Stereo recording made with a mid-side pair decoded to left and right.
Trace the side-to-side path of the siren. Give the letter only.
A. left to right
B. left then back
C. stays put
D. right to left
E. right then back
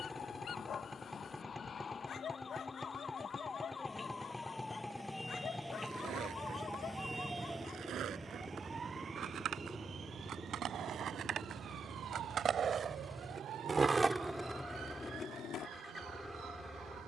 A.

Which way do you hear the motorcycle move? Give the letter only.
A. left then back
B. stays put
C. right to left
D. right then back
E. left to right
B.